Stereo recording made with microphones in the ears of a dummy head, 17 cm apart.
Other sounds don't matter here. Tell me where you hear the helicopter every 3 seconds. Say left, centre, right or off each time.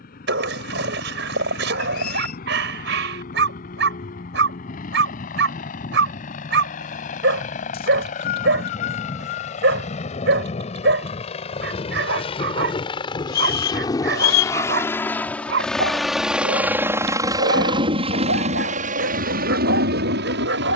left, left, left, left, left, centre, right.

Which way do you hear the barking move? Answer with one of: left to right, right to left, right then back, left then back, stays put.
stays put.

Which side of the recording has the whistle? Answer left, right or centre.
left.